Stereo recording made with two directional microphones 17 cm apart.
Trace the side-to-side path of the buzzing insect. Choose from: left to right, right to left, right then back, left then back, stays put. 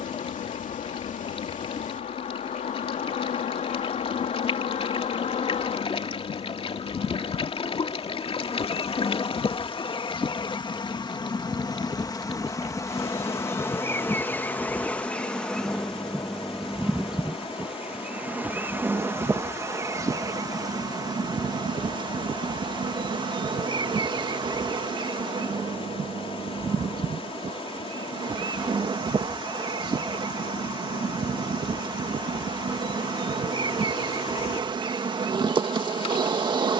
left to right.